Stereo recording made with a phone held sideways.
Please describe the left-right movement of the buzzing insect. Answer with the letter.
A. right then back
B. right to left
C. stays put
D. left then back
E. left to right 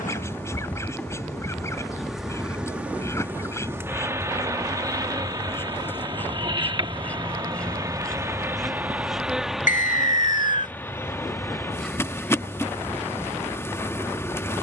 A.